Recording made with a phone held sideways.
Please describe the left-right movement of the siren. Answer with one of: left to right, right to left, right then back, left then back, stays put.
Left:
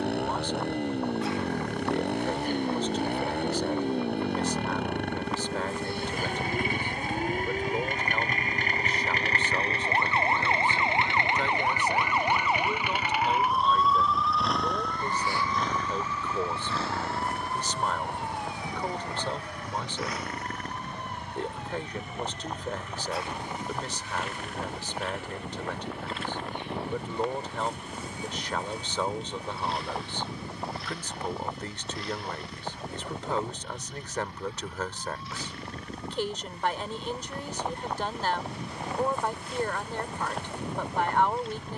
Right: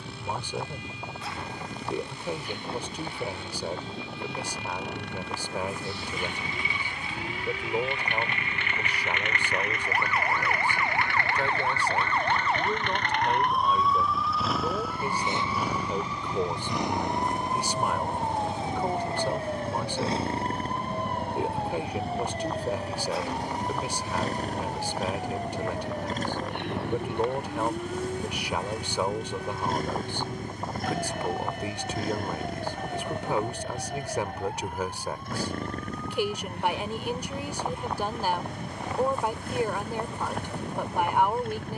left to right.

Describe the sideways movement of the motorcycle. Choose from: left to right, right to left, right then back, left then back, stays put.
left to right.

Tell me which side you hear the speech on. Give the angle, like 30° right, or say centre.
10° right.